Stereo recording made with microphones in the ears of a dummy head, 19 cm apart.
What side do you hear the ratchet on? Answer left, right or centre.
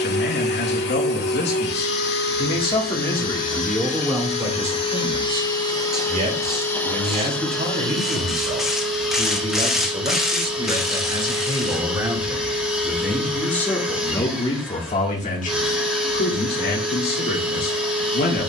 centre.